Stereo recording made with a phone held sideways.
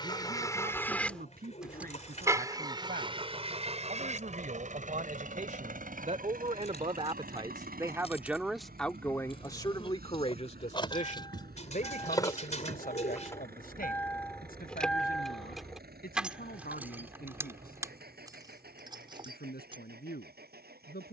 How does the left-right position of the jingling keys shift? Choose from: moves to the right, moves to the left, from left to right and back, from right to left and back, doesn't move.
moves to the right.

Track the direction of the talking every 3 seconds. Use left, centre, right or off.
right, right, right, left, left, left, left.